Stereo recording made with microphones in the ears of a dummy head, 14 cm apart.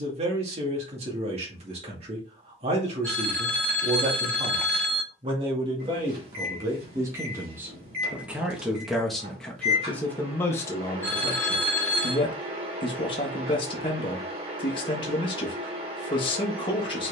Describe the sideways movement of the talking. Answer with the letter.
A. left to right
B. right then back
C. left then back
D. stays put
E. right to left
E.